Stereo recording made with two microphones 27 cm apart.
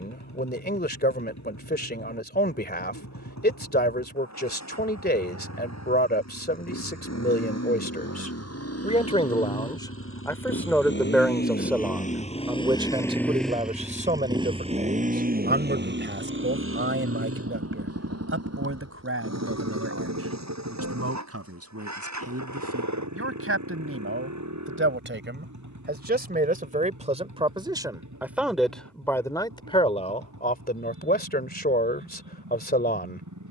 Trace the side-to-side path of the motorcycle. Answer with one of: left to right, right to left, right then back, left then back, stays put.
left to right.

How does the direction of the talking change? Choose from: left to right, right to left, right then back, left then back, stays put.
right then back.